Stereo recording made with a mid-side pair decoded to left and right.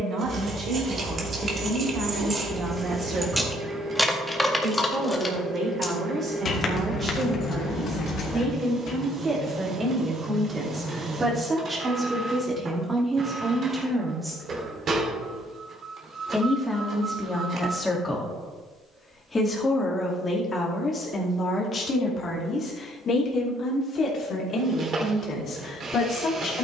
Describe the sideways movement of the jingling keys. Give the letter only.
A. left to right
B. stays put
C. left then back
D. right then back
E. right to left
E.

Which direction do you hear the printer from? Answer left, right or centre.
right.